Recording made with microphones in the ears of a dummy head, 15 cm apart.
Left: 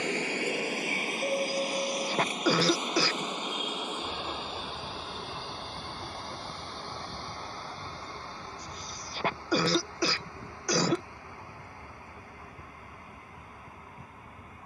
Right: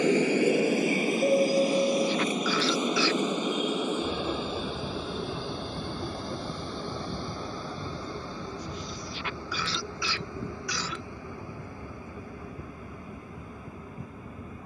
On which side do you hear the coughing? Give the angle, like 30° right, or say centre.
30° left.